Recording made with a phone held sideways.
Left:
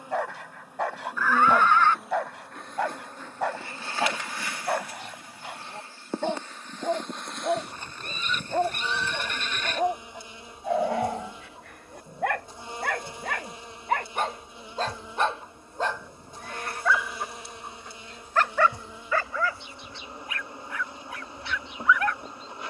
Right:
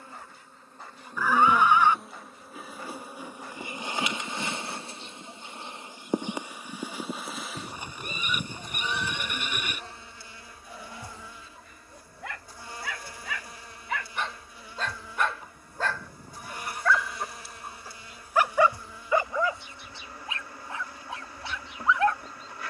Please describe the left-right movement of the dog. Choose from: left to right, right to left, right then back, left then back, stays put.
left to right.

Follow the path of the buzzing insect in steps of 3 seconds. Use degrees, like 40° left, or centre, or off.
10° left, 20° right, centre, 20° left, 20° left, 20° left, 20° left, 20° left.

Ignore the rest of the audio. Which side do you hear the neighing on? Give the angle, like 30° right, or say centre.
10° right.